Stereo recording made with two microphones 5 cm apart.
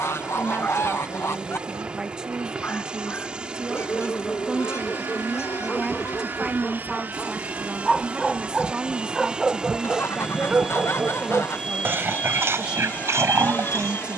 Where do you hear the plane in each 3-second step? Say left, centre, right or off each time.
right, right, right, centre, left.